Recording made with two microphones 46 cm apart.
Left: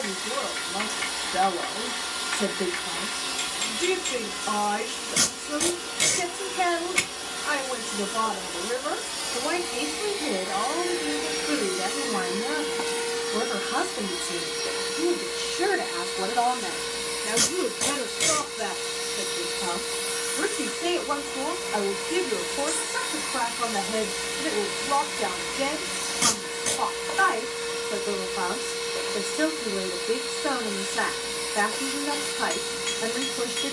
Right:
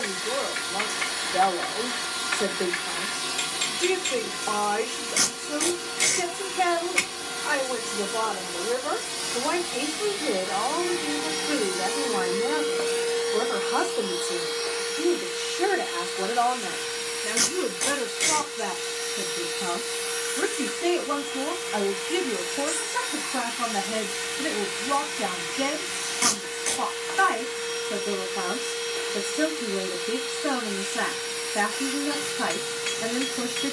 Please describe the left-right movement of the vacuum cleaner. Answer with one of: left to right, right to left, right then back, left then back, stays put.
right to left.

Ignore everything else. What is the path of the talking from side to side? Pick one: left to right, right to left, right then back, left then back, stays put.
left to right.